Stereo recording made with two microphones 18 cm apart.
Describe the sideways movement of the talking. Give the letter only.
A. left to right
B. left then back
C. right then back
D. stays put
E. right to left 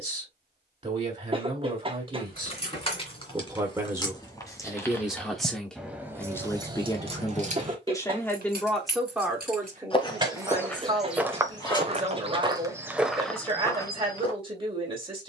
B.